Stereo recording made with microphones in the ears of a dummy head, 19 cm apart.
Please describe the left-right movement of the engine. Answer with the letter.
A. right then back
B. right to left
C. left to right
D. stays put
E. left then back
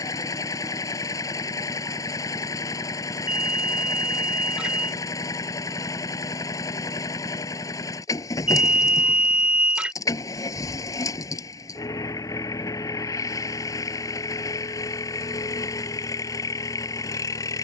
D.